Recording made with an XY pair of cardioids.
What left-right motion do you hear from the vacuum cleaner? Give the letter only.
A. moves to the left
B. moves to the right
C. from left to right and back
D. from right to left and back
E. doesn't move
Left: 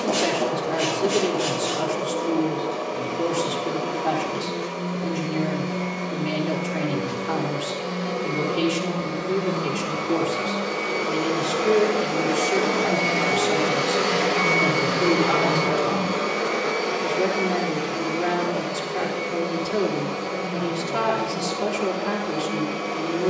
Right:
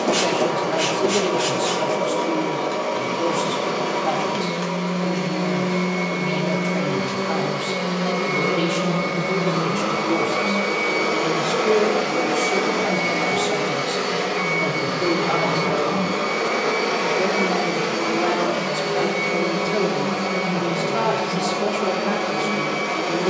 D.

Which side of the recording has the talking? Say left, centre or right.
centre.